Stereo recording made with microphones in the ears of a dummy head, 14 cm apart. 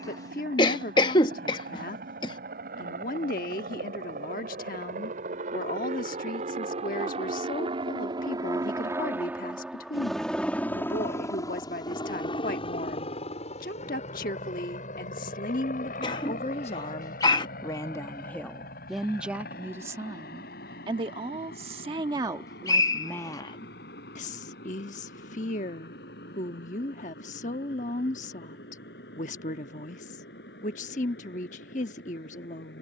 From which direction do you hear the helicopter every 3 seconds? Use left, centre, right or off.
right, right, right, centre, left, left, left, left, left, left, left.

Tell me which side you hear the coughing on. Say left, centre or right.
left.